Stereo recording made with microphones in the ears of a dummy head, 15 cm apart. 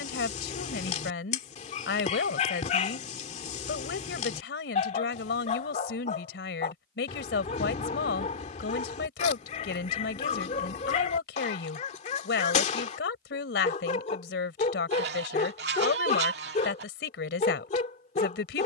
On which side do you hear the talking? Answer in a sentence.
You can hear the talking on the left.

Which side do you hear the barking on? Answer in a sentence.
You can hear the barking on the left.